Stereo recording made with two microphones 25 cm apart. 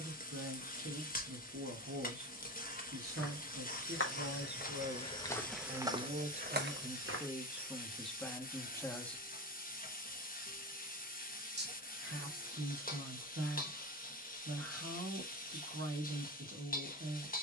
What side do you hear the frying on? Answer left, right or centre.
left.